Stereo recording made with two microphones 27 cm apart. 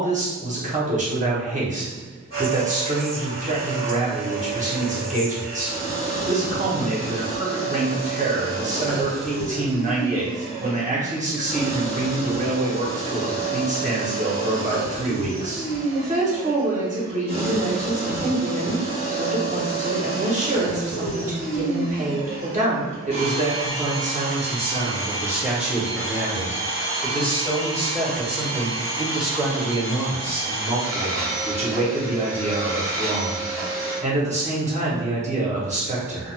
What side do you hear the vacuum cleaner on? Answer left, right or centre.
left.